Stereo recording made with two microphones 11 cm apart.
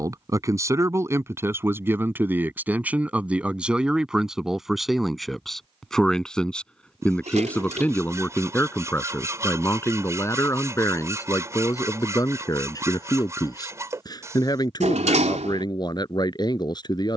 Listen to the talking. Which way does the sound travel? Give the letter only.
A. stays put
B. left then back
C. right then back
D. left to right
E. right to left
E.